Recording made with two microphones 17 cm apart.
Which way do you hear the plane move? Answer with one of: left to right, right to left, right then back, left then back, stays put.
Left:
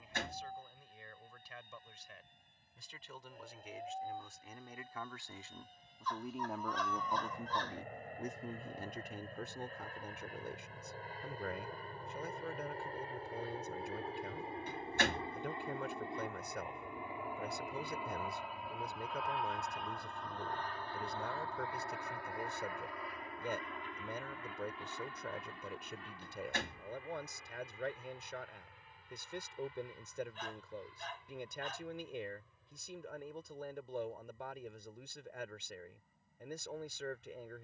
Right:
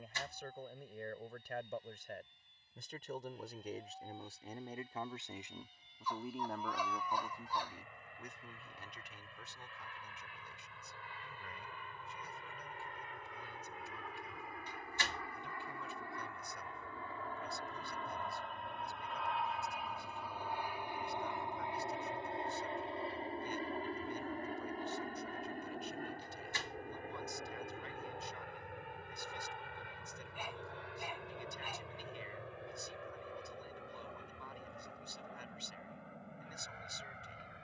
left to right.